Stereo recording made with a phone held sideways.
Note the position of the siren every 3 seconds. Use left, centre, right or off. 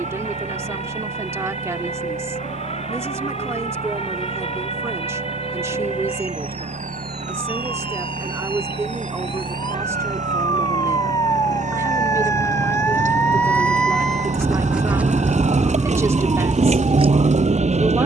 left, left, left, left, centre, right.